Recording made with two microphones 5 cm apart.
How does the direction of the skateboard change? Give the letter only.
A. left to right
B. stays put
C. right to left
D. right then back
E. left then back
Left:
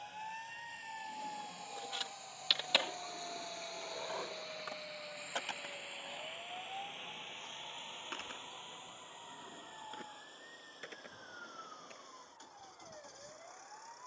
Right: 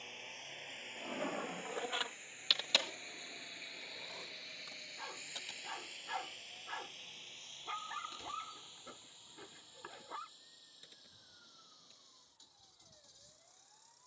C.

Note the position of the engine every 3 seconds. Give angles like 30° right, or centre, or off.
40° right, centre, 30° left, 50° left, 50° left.